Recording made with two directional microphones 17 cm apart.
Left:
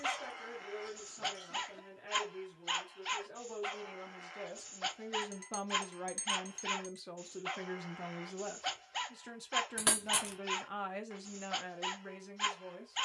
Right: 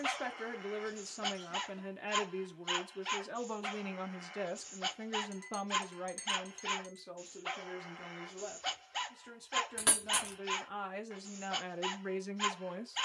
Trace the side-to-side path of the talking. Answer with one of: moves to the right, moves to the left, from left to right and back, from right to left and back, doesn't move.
from right to left and back.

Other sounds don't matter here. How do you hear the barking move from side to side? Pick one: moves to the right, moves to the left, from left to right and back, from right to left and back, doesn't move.
doesn't move.